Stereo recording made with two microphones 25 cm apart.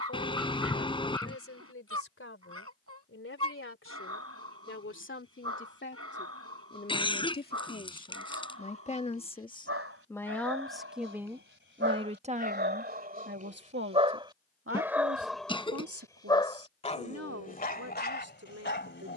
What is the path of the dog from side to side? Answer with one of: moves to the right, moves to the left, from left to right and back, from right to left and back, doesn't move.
moves to the left.